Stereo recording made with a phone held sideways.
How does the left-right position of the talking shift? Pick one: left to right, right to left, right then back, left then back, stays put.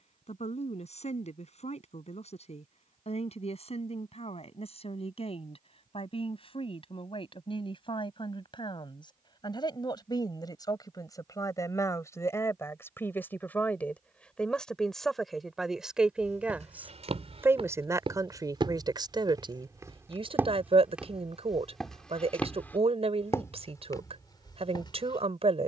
left to right.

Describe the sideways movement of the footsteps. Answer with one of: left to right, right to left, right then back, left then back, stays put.
right to left.